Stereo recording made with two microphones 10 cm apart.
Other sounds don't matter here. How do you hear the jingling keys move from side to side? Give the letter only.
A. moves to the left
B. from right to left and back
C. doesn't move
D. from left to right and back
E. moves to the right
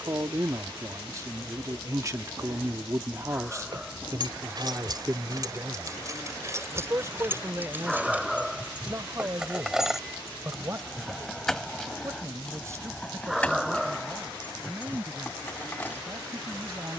A.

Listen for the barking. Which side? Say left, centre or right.
centre.